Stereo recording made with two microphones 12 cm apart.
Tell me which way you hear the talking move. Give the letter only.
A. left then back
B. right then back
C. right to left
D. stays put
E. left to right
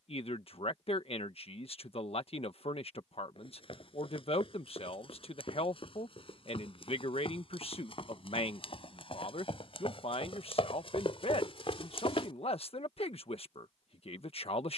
D.